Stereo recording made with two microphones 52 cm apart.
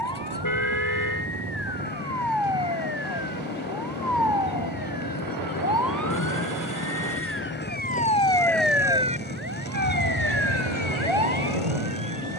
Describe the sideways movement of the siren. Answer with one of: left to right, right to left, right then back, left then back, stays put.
left to right.